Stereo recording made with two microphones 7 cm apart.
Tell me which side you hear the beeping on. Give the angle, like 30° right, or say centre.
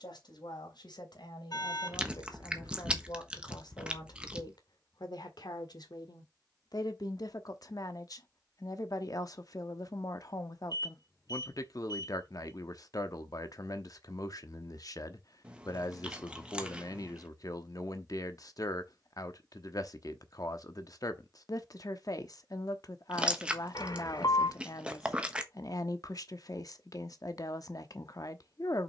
60° left.